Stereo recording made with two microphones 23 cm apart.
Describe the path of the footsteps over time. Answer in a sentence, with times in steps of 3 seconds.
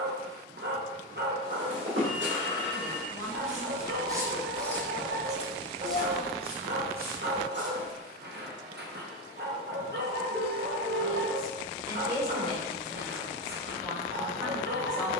You can hear the footsteps on the right from 0 s, in the centre from 3 s, on the right from 6 s and not at all from 9 s.